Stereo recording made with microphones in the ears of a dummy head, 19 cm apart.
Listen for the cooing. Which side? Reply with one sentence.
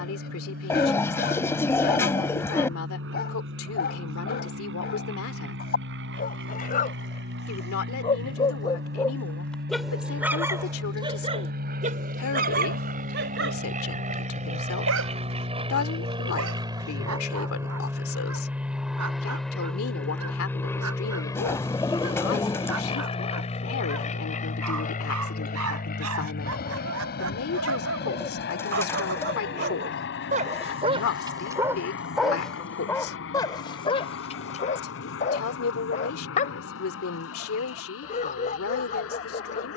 In this clip you hear the cooing in the centre.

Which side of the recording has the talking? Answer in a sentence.
You can hear the talking on the left.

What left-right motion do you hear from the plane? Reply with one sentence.
You can hear the plane go from the right side to the left.